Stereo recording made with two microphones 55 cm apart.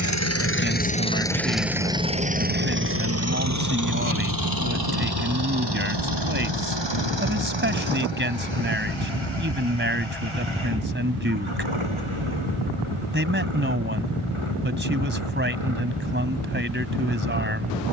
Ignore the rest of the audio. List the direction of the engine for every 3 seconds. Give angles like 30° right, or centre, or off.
centre, 40° right, 50° right, 60° right, 60° right, 60° right.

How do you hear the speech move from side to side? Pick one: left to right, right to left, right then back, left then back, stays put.
stays put.